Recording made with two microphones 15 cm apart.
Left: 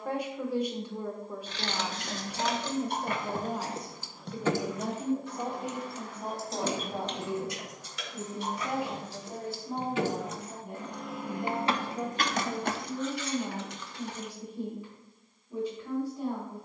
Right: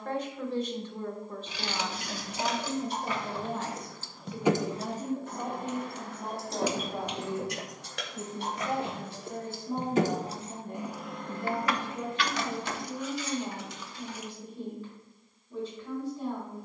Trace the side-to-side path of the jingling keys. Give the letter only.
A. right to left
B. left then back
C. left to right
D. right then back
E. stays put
D.